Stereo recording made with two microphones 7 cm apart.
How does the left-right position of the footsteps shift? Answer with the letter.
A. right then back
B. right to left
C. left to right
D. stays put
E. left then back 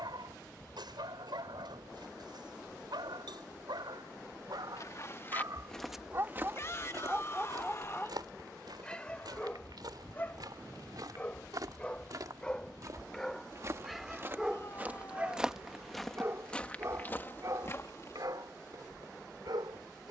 A.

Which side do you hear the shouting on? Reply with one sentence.
You can hear the shouting on the left.